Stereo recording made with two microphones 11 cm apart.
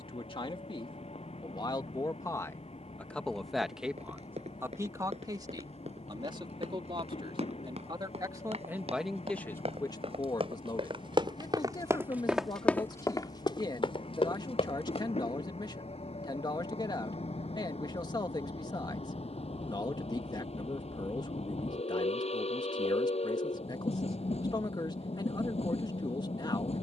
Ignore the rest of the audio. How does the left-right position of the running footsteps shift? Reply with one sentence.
In this clip you hear the running footsteps move from right to left.